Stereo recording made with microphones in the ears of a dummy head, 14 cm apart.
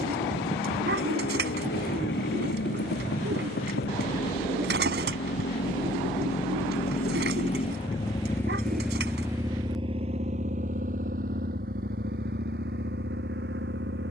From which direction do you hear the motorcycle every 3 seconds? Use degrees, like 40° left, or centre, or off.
80° left, 70° left, 40° left, 40° right, 70° right.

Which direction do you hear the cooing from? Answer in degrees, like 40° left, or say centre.
80° right.